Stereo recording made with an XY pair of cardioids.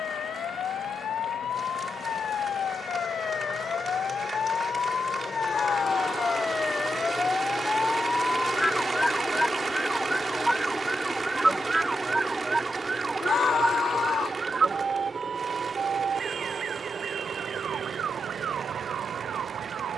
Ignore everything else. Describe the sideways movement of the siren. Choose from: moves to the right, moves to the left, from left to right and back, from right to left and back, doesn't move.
moves to the right.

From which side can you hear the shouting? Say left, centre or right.
left.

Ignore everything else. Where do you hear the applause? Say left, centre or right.
right.